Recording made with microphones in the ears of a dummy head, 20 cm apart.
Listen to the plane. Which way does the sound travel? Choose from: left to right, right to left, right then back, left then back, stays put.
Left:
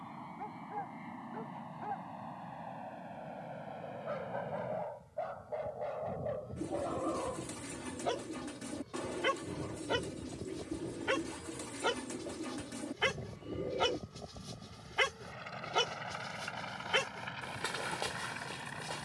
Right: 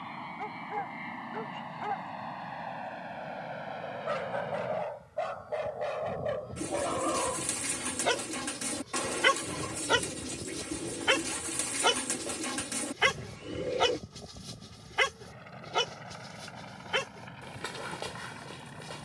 right to left.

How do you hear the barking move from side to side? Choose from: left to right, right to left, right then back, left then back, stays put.
right to left.